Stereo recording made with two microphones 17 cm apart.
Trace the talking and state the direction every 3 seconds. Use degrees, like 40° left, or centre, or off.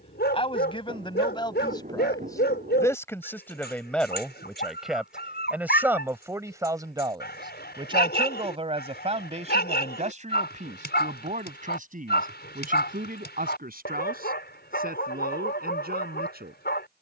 30° left, centre, 30° right, 50° right, 60° right, 70° right.